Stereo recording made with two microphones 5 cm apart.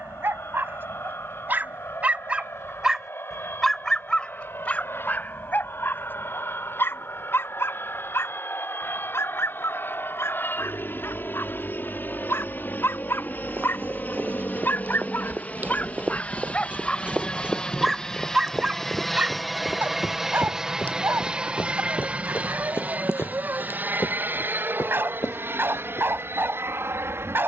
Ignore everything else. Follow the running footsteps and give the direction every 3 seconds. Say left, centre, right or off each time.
off, off, off, off, right, right, centre, left, left.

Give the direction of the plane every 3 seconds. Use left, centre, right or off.
left, left, left, left, left, left, centre, right, right.